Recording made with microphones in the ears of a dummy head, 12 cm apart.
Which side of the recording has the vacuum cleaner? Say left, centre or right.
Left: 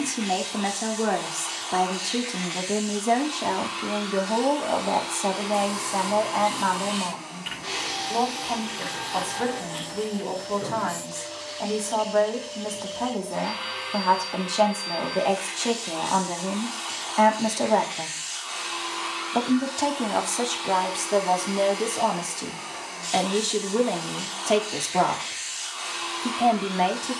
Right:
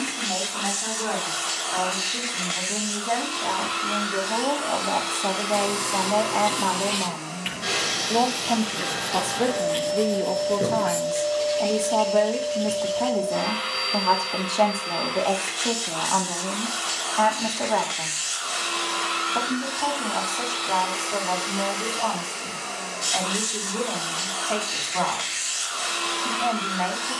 right.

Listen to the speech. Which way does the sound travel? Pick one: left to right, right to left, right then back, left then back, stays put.
right then back.